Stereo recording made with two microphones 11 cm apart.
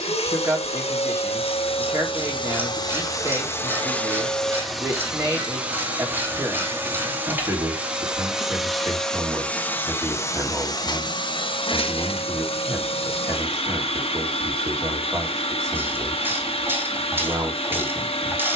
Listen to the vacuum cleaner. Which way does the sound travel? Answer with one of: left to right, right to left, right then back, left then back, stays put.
right then back.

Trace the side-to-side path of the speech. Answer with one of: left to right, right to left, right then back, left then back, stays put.
stays put.